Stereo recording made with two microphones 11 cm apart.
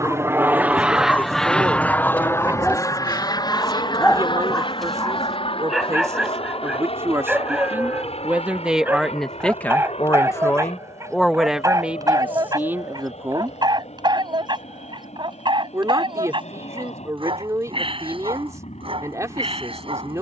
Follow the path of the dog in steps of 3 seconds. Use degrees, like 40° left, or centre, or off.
10° left, centre, 10° right, 30° right, 40° right, 50° right, 60° right.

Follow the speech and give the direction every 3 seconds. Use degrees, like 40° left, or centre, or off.
30° right, 30° right, 20° right, 10° left, 20° right, 30° right, 30° right.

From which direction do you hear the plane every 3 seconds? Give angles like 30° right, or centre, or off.
centre, 50° left, 60° left, 70° left, 70° left, 70° left, 70° left.